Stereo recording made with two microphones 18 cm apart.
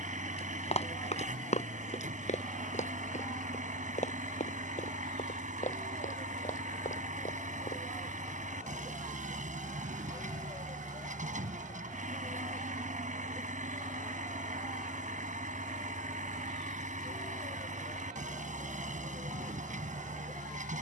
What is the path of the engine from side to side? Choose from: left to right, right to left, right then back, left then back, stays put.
stays put.